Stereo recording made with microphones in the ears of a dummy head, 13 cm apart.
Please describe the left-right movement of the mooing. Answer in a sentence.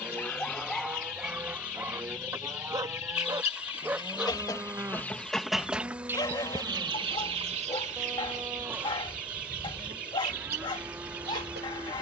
You can hear the mooing stay put.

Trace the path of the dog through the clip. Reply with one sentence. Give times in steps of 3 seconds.
In this clip you hear the dog in the centre from 0 s and on the left from 6 s.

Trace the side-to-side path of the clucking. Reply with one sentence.
You can hear the clucking travel towards the right.